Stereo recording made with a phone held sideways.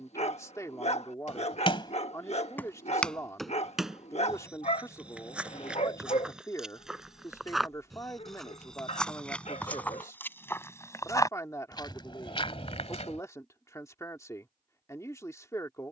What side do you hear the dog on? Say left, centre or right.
left.